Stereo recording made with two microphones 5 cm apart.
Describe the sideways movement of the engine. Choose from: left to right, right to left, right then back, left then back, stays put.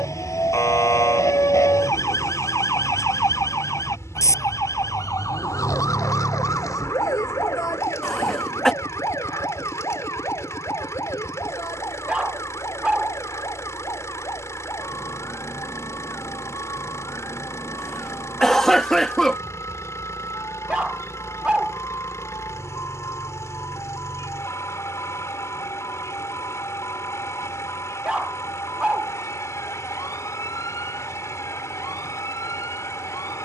stays put.